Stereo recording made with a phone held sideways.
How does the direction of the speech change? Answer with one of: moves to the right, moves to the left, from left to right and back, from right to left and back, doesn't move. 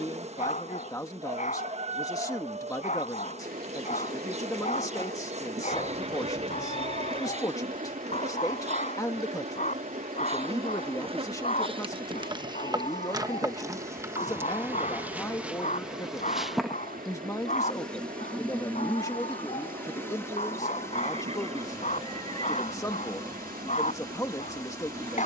doesn't move.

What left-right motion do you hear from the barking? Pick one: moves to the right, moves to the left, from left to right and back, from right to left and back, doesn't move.
doesn't move.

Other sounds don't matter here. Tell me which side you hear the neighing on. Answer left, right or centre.
right.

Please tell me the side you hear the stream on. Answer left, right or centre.
right.